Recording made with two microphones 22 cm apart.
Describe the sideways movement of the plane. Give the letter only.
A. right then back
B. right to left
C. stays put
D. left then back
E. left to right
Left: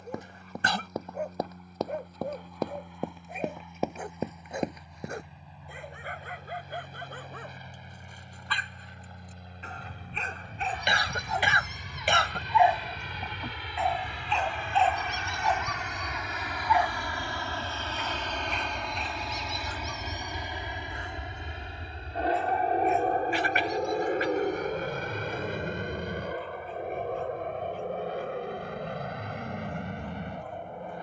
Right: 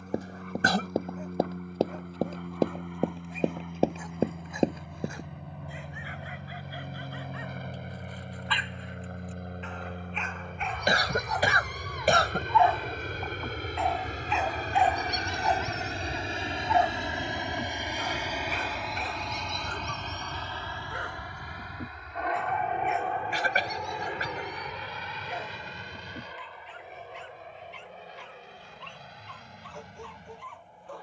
B.